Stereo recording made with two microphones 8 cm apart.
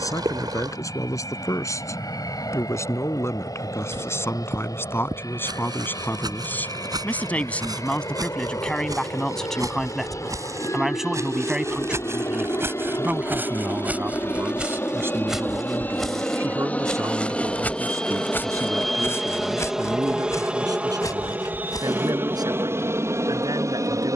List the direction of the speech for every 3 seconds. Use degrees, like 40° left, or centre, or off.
40° left, 30° left, 20° left, centre, 20° right, 40° right, 50° right, 60° right.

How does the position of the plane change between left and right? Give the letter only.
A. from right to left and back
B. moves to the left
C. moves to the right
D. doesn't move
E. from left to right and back
C.